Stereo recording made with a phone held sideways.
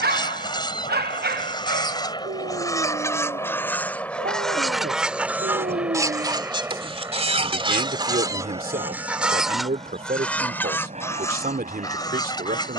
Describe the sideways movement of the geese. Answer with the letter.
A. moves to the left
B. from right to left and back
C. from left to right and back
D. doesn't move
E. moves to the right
C.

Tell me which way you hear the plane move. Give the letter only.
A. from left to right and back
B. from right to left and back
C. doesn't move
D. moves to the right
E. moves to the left
D.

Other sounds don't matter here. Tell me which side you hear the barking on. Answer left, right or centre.
right.